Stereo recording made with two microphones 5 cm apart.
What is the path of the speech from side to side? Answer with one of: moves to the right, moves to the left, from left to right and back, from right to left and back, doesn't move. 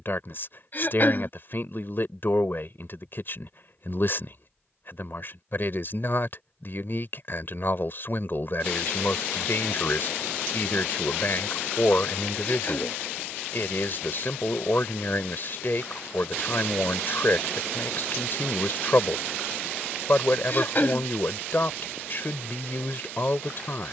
doesn't move.